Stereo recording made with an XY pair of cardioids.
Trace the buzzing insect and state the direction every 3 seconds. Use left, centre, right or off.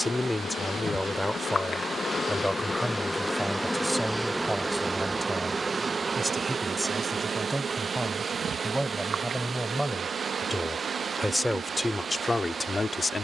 left, centre, right, right, right.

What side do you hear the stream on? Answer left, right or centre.
right.